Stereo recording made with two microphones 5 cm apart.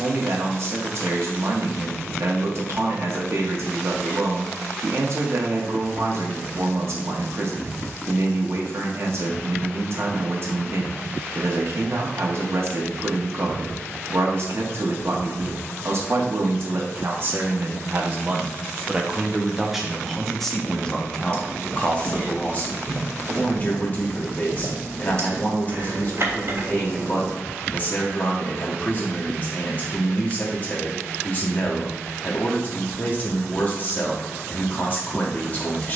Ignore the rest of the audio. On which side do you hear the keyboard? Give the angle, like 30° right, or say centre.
60° right.